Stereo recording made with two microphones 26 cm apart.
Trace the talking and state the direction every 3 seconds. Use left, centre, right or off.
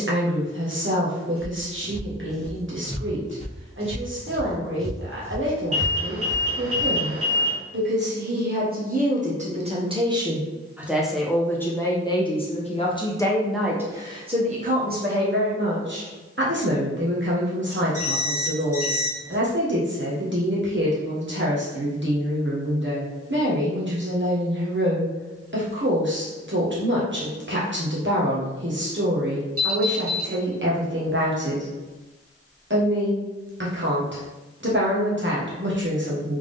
right, right, right, centre, centre, right, right, right, right, right, right, right.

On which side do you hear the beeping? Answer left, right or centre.
right.